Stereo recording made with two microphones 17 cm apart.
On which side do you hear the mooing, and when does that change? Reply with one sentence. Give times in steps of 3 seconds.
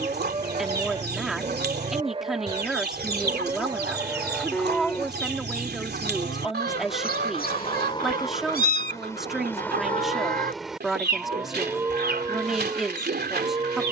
In this clip you hear the mooing on the right from 0 s, in the centre from 3 s, on the left from 6 s, in the centre from 9 s and on the right from 12 s.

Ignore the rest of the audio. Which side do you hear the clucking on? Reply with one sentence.
You can hear the clucking on the right.